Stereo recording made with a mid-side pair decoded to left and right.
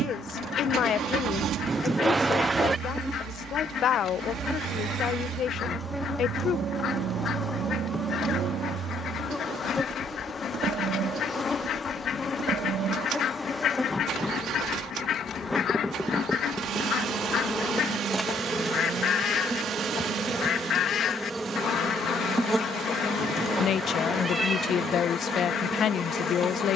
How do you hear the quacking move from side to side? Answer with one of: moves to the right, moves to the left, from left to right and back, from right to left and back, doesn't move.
doesn't move.